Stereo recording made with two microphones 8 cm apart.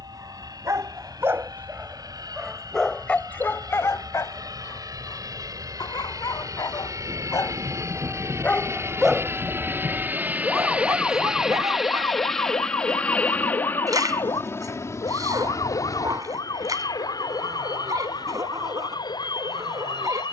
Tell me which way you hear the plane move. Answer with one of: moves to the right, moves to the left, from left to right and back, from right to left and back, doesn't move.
moves to the left.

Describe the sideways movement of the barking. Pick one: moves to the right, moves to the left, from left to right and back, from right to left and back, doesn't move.
from right to left and back.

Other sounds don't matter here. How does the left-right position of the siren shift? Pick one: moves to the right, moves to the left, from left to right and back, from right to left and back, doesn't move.
moves to the left.